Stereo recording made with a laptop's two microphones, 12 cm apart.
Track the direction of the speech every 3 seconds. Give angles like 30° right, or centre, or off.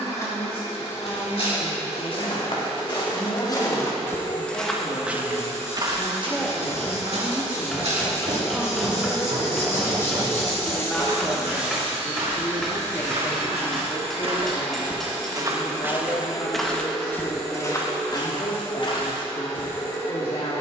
50° left, 50° left, centre, centre, 30° left, 50° left, 50° left.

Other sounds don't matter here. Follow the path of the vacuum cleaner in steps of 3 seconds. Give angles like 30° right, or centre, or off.
20° left, 20° left, 20° left, centre, 20° right, centre, 20° left.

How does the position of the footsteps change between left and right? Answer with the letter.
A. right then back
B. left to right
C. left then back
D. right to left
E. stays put
A.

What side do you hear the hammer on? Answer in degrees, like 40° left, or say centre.
centre.